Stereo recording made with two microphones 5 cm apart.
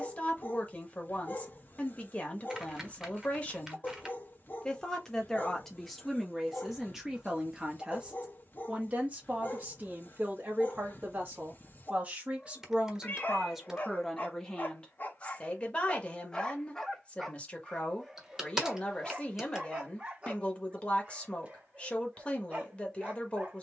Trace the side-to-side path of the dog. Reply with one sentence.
In this clip you hear the dog go from the left side to the right.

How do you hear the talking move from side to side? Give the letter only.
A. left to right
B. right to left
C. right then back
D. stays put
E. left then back
C.